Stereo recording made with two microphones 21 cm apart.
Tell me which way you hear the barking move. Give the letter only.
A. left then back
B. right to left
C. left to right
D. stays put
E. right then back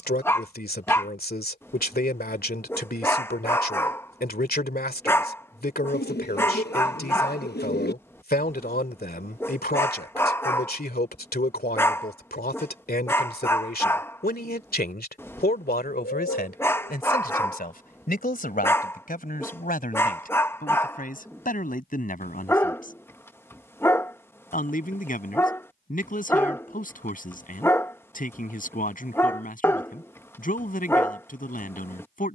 D.